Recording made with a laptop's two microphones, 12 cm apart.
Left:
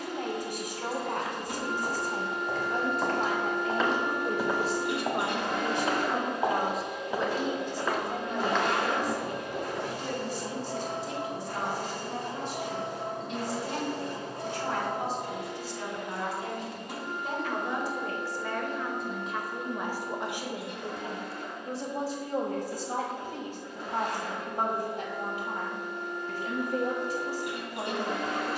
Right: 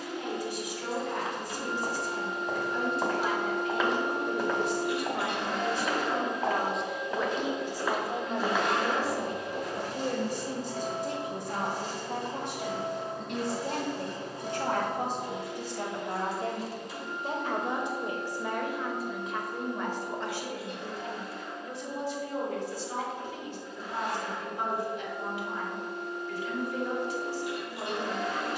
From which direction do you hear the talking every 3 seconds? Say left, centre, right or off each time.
left, left, centre, right, right, right, centre, left, left, left.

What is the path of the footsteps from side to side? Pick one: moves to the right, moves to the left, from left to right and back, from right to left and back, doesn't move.
from right to left and back.